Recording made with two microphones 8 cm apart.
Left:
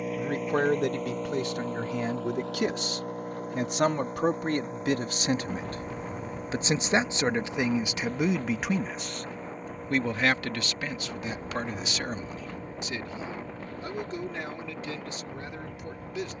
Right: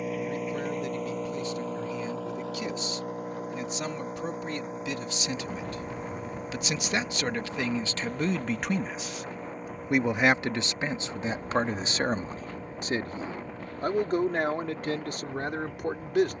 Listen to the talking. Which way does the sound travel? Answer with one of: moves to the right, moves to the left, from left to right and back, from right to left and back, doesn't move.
moves to the right.